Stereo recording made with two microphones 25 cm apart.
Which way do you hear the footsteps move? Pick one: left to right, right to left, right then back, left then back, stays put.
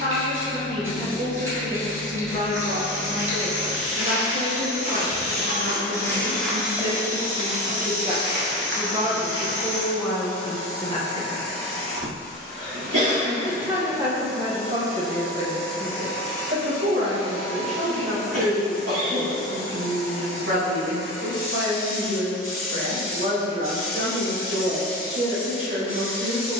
left to right.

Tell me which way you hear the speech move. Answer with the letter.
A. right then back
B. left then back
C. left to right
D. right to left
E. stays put
B.